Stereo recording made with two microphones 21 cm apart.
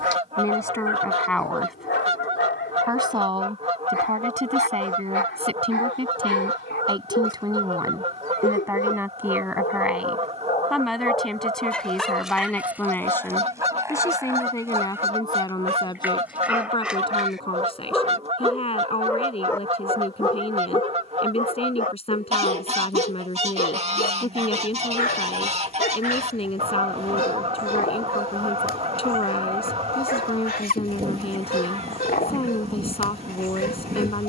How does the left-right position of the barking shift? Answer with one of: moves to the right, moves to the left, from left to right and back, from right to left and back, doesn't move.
from left to right and back.